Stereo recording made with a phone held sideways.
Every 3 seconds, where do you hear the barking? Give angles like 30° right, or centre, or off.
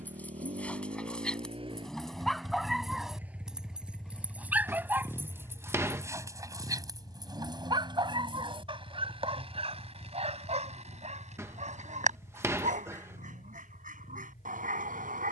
centre, 10° right, 30° right, 50° right, 60° right.